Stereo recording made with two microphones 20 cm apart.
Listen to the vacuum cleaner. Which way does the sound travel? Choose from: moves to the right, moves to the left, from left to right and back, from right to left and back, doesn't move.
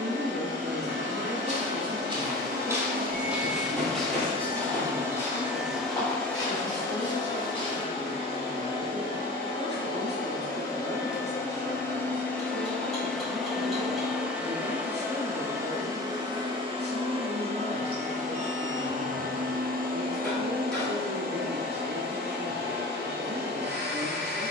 from right to left and back.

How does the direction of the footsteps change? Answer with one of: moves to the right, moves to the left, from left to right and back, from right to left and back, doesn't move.
moves to the left.